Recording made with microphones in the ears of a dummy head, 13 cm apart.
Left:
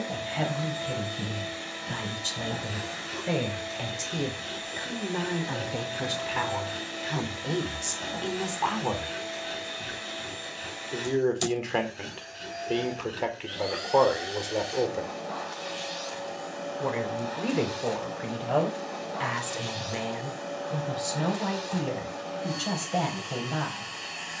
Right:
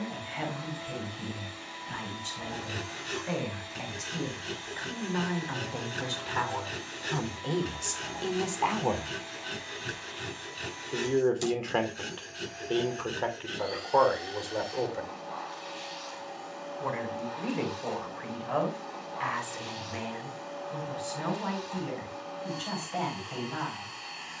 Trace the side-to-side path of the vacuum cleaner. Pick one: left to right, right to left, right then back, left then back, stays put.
stays put.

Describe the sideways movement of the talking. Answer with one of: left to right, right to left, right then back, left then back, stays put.
right then back.